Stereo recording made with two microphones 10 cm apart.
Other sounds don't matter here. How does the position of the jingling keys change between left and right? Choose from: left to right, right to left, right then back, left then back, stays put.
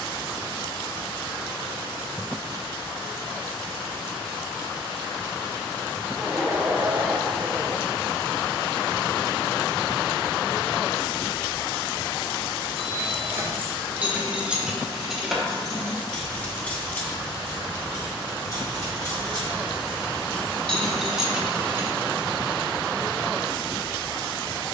left then back.